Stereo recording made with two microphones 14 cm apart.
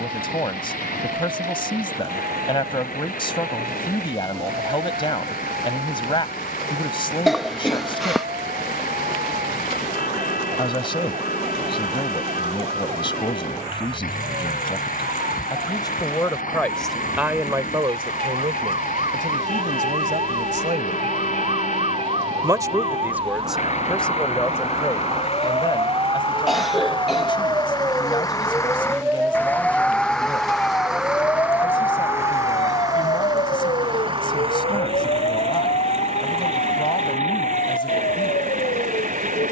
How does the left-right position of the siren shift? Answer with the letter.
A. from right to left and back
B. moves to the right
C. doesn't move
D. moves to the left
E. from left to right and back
D.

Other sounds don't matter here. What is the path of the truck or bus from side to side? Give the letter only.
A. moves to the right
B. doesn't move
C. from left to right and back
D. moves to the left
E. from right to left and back
A.